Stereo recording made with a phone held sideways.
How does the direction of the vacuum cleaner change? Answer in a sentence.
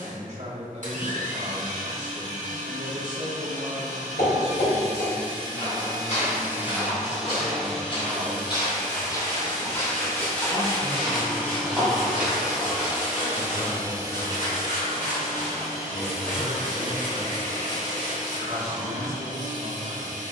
You can hear the vacuum cleaner move from right to left and back again.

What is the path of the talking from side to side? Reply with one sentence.
In this clip you hear the talking move from right to left and back again.